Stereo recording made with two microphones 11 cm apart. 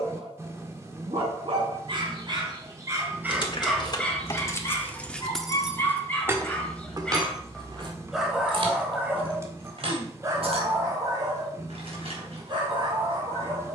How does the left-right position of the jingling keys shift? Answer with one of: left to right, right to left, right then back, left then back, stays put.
left to right.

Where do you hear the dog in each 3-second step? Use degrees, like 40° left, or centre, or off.
50° right, 10° left, centre, 30° right, 50° right.